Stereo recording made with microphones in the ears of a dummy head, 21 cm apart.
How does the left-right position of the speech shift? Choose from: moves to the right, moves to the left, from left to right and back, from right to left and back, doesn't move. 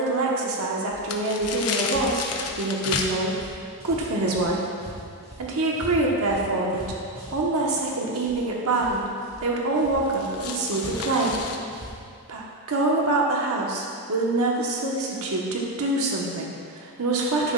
doesn't move.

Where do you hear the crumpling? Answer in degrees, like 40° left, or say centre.
70° left.